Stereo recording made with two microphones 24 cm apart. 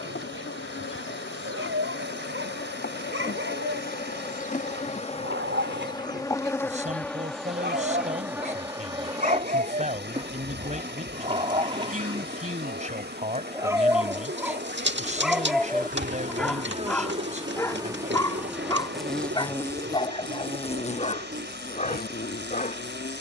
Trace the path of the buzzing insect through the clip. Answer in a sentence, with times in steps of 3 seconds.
In this clip you hear the buzzing insect on the left from 0 s, in the centre from 6 s, on the right from 9 s, in the centre from 18 s and on the left from 21 s.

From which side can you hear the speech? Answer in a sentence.
In this clip you hear the speech on the right.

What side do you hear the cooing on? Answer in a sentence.
In this clip you hear the cooing on the right.